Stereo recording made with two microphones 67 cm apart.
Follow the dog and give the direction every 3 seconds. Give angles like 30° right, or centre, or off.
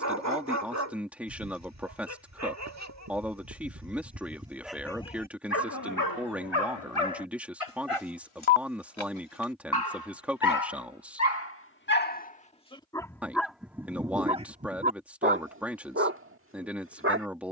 20° right, centre, 40° left, 30° left, centre, 20° right.